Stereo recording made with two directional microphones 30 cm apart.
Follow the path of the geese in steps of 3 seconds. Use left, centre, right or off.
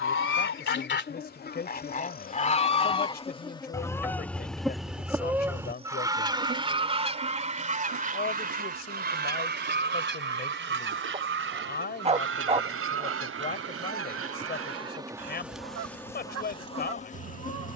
left, centre, right, right, right, right.